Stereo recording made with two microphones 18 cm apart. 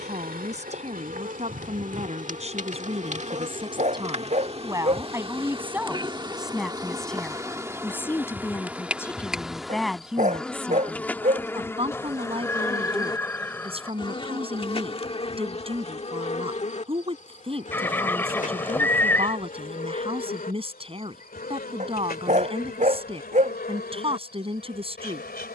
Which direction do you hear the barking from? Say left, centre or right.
right.